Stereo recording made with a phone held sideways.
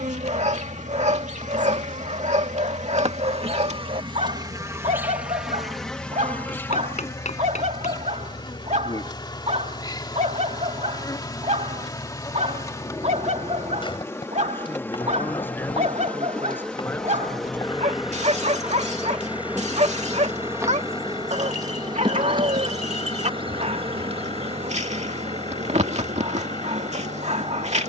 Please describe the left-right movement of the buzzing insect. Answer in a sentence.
You can hear the buzzing insect go left and come back.